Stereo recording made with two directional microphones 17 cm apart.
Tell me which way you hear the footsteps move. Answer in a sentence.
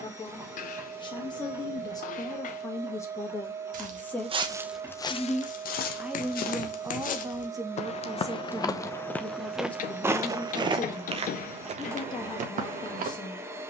You can hear the footsteps go left and come back.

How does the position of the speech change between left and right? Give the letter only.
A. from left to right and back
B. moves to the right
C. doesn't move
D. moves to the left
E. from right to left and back
A.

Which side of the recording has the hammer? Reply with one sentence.
You can hear the hammer on the left.